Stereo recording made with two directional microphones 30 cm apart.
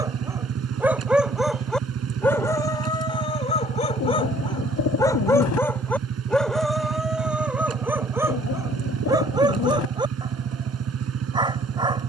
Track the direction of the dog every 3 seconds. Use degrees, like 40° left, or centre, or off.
centre, 10° left, centre, 10° right.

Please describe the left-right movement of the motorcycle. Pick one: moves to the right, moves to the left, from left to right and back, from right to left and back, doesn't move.
doesn't move.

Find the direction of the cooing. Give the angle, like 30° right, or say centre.
60° left.